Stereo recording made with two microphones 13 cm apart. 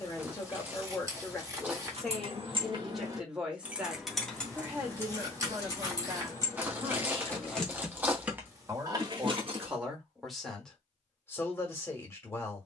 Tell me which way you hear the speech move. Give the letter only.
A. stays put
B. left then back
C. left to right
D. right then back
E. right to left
D.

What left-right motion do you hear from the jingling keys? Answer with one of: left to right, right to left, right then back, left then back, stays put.
left then back.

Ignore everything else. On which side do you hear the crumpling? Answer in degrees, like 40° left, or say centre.
10° right.